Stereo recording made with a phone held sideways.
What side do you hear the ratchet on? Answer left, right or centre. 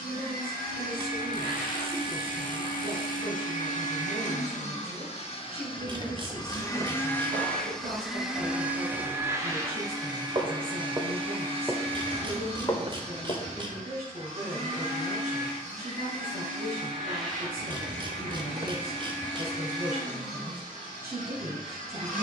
right.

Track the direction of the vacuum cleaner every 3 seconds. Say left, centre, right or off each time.
left, left, centre, right, right, right, right, right.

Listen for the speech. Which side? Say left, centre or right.
right.